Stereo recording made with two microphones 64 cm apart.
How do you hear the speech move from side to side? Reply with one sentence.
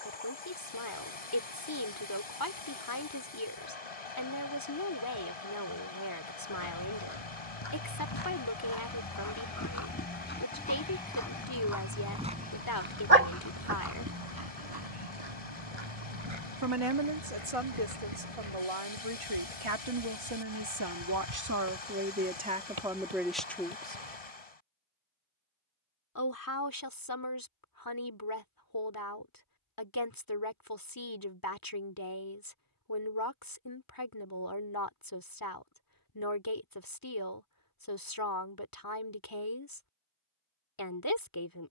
In this clip you hear the speech go right and come back.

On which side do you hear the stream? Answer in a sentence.
You can hear the stream on the left.